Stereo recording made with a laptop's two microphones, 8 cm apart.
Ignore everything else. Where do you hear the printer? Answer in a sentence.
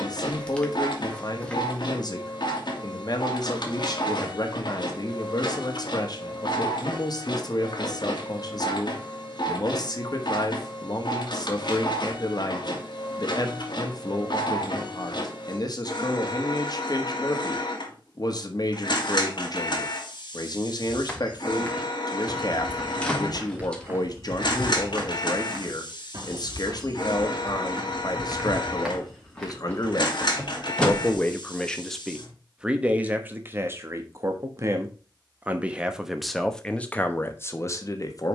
In this clip you hear the printer on the left.